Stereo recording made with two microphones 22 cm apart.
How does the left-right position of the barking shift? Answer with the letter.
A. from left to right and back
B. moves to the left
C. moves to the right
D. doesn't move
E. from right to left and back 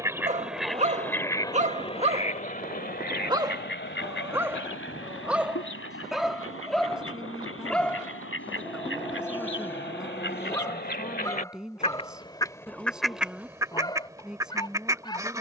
B.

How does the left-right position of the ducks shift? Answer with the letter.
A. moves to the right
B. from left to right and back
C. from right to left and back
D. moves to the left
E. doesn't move
C.